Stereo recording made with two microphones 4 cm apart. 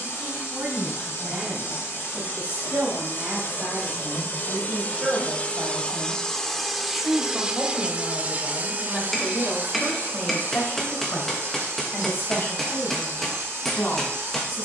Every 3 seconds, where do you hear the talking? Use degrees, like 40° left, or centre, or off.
40° right, 30° right, 10° left, 40° left, 60° left.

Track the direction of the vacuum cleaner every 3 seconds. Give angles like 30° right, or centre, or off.
70° left, 40° left, 10° right, 60° right, 70° right.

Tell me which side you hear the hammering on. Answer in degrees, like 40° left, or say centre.
10° left.